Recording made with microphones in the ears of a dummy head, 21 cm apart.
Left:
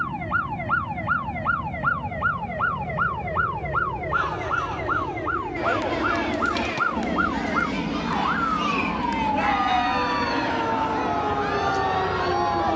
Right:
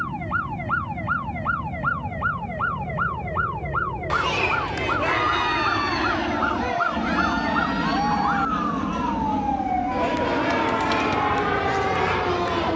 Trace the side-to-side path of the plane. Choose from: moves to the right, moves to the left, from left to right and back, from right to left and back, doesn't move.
moves to the right.